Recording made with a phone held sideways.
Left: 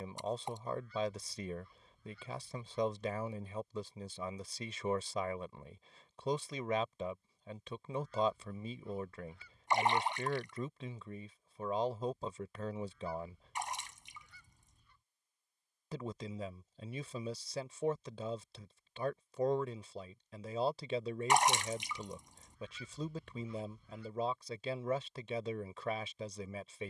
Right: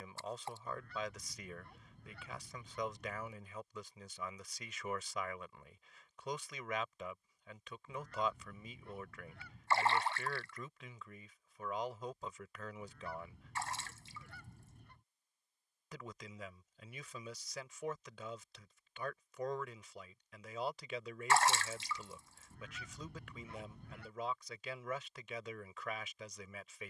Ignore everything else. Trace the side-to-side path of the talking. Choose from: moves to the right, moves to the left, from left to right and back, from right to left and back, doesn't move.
doesn't move.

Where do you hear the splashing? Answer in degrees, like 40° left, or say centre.
20° left.